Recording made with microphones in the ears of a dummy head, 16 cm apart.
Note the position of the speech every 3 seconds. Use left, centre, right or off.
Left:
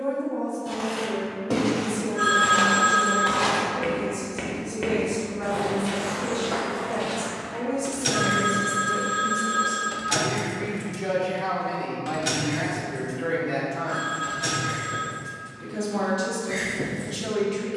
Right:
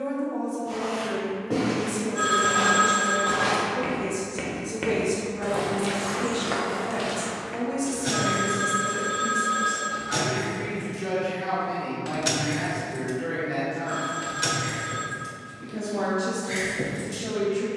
right, right, right, centre, left, left.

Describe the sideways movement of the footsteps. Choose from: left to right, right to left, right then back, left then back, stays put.
left to right.